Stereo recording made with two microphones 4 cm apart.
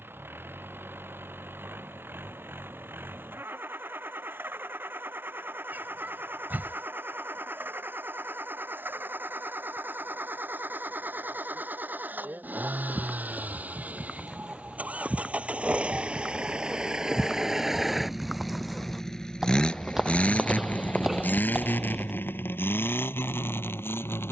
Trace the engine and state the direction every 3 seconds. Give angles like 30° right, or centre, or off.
60° right, 60° right, 60° right, 50° right, 40° right, 20° right, 20° left, 60° left.